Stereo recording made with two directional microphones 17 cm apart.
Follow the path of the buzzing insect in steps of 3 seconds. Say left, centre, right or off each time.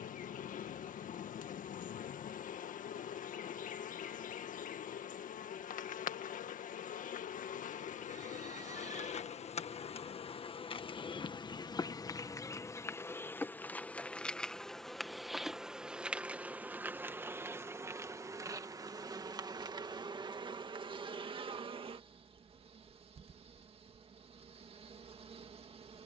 left, left, left, left, centre, centre, right, right, right.